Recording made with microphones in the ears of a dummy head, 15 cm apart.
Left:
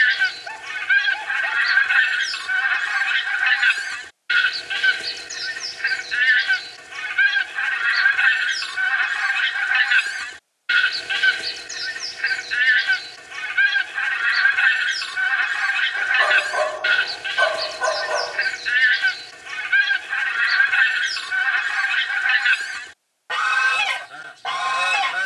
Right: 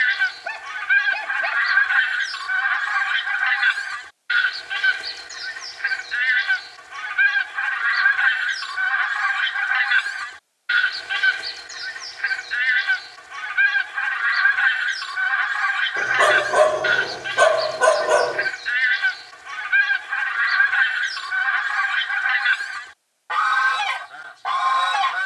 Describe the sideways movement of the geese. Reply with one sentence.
You can hear the geese stay in one place.